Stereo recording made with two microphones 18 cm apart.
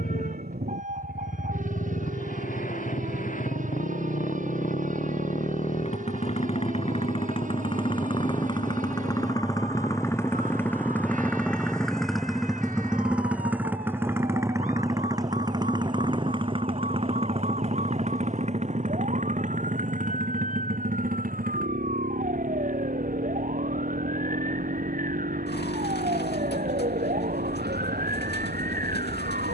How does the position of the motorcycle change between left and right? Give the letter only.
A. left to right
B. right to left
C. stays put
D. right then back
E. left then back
A.